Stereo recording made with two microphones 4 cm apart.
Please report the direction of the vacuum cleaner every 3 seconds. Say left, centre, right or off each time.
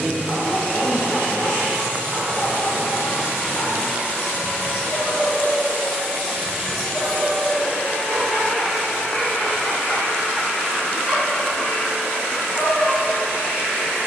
left, left, centre, left, left.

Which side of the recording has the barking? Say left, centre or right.
left.